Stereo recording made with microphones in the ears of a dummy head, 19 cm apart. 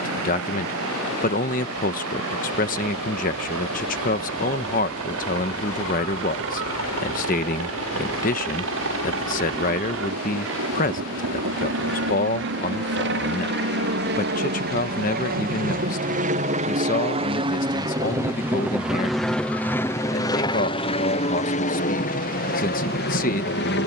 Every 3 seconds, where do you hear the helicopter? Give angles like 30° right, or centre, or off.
80° right, 70° right, 70° right, 70° right, 60° right, 30° right, 10° left, 40° left.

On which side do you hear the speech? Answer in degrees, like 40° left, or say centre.
40° left.